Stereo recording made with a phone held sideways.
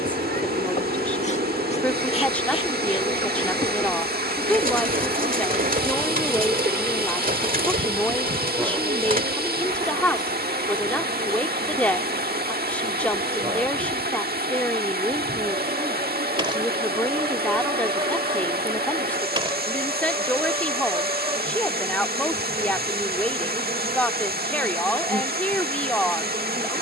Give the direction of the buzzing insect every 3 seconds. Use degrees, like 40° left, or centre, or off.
40° left, 20° left, 10° right, 30° right, 30° right, 30° right, 30° right, 30° right, 30° right.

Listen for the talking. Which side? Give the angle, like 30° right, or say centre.
10° left.